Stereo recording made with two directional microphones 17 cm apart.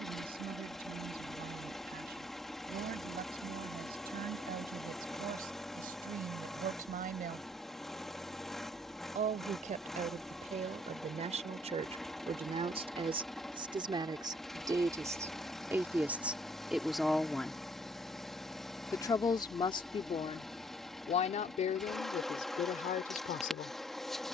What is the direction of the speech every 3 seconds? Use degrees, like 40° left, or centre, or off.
60° right, 60° right, 50° right, 40° right, 30° right, 10° right, 30° left, 50° left.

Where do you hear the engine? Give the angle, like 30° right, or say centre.
centre.